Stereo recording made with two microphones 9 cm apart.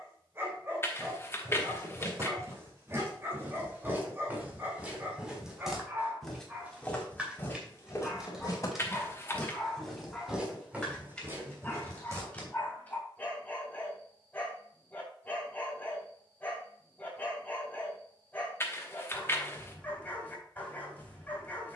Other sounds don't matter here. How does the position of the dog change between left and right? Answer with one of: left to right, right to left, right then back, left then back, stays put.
right to left.